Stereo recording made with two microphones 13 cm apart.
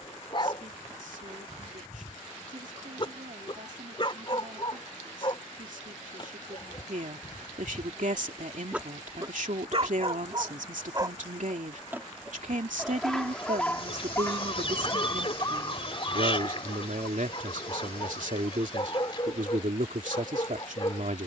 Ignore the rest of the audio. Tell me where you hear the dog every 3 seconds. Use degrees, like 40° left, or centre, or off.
40° left, 40° left, 30° left, 30° right, 10° left, 30° left, 40° left.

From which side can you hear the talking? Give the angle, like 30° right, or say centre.
70° right.